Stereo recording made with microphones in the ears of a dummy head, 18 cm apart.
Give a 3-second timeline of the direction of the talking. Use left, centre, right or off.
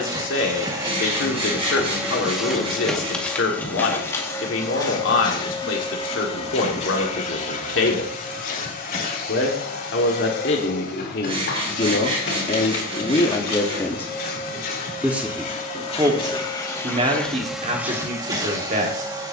left, left, left, left, left, right, right.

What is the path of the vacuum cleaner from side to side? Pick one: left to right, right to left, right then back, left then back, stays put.
left then back.